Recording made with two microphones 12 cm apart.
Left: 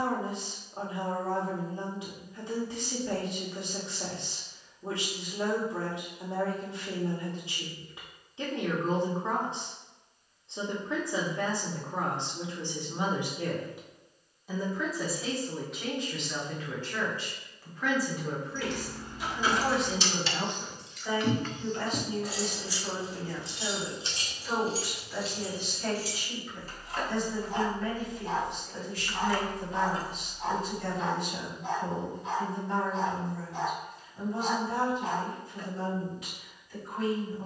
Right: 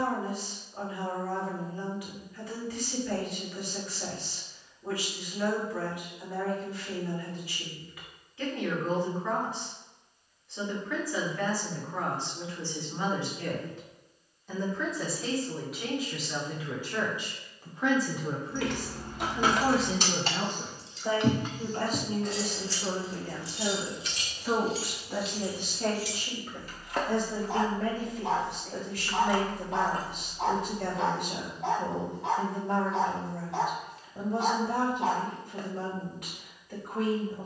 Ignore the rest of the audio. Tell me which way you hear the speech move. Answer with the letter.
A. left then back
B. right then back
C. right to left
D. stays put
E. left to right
E.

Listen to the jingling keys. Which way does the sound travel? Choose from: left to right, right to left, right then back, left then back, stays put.
left then back.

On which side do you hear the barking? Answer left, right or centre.
right.